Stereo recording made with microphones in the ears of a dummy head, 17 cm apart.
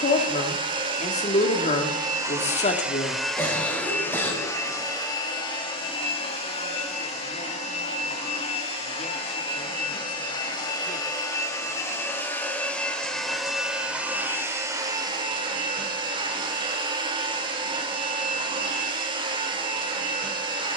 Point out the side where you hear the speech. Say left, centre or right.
left.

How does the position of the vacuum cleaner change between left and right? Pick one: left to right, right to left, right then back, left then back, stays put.
left then back.